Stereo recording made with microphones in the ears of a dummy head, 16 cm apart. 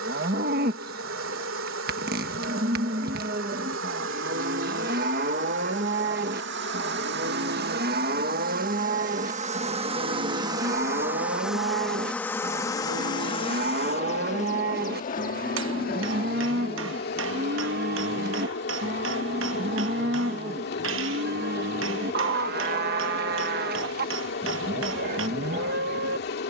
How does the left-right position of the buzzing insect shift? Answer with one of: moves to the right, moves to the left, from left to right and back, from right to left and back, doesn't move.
moves to the left.